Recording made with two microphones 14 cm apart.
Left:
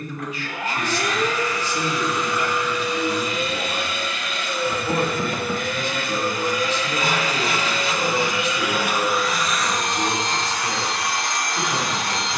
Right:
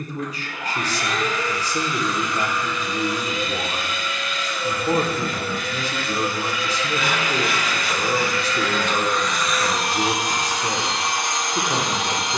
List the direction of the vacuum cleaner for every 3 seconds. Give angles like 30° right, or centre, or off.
70° left, 60° left, 30° left, 10° right.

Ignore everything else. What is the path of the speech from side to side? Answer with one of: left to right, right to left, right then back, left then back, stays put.
stays put.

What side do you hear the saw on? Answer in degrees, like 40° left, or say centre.
40° left.